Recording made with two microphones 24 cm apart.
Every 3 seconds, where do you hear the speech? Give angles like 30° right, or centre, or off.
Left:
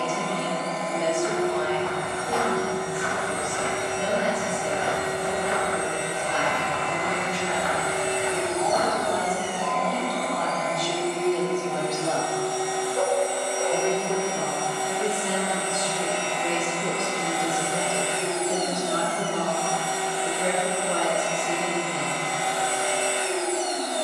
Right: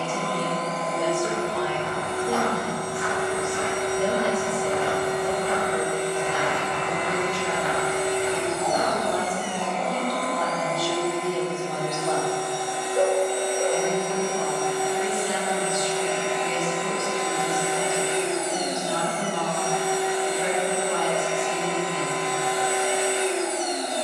50° right, 50° right, 40° right, 10° right, 30° left, 50° left, 50° left, 50° left.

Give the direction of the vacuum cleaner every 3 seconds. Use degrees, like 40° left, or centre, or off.
20° left, 20° left, 10° left, centre, 20° right, 20° right, 20° right, 20° right.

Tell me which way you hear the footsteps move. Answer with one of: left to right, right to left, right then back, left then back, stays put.
left then back.